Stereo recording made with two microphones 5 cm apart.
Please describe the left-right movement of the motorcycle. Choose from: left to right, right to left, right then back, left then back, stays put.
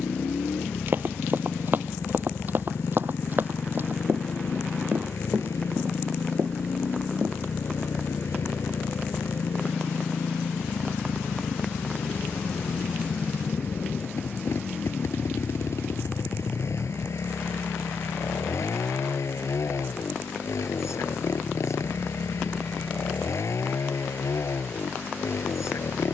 stays put.